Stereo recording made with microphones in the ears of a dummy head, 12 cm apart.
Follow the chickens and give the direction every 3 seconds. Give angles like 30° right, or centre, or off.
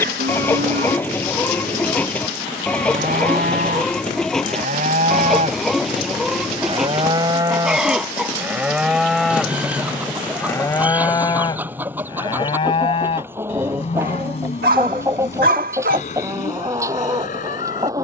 10° left, centre, centre, 10° right, 20° right, 20° right.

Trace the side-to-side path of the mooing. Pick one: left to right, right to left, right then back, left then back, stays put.
right to left.